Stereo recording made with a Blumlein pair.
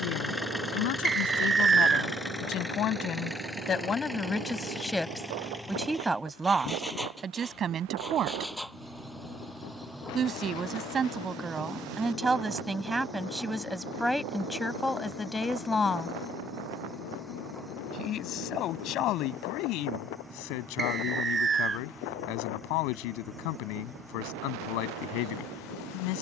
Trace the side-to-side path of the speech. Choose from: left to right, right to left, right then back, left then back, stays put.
right then back.